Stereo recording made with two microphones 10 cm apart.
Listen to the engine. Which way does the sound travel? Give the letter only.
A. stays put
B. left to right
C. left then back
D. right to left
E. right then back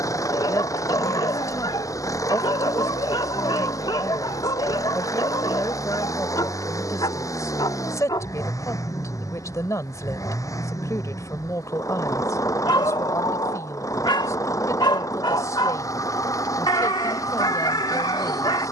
A.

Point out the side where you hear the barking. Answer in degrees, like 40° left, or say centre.
50° left.